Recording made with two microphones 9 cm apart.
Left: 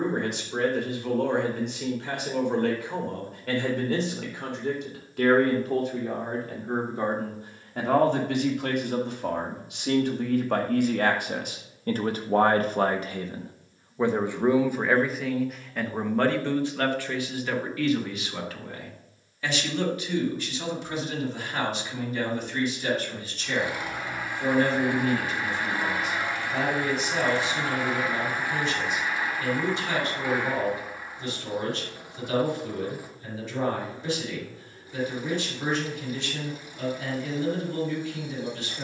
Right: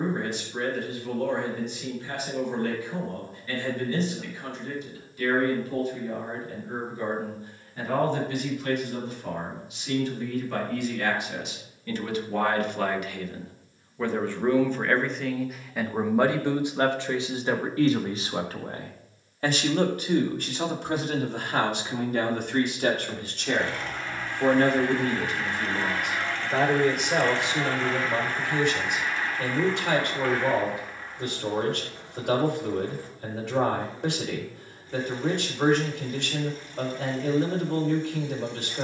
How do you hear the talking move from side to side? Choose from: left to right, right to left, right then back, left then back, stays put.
left to right.